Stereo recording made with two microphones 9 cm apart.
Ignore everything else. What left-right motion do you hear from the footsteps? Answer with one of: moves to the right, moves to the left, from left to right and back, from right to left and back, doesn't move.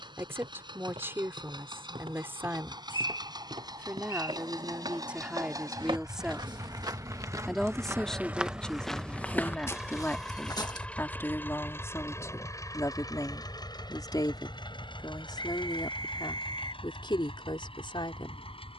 moves to the left.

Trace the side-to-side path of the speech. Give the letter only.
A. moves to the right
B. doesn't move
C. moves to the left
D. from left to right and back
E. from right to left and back
C.